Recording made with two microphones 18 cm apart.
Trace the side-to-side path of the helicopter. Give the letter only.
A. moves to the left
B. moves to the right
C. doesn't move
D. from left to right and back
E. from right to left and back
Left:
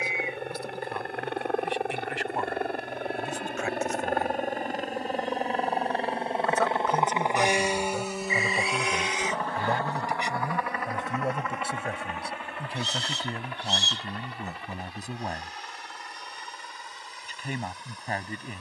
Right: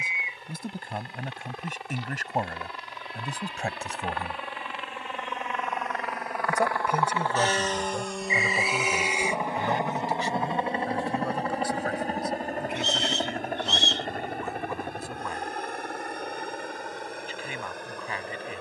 B.